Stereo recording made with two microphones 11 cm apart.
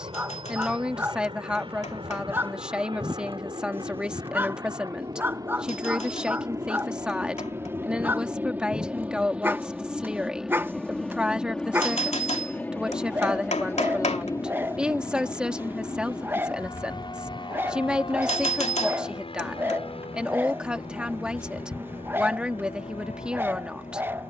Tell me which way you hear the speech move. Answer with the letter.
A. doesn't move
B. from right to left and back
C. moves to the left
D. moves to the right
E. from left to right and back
A.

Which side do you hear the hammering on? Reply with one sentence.
You can hear the hammering on the left.